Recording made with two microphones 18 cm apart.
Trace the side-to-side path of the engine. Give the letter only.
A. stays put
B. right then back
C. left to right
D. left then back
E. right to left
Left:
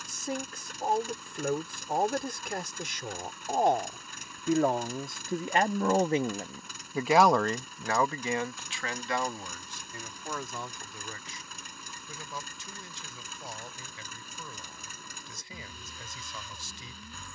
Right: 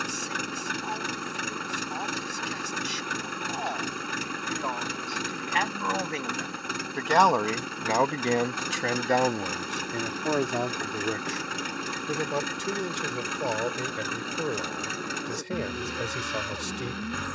A.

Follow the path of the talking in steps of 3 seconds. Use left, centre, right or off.
left, left, centre, right, right, right.